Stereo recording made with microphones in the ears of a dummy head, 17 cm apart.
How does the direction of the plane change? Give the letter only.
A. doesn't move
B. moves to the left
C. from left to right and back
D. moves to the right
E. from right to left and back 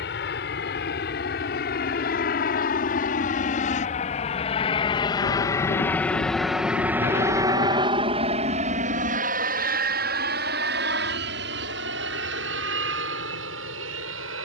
D.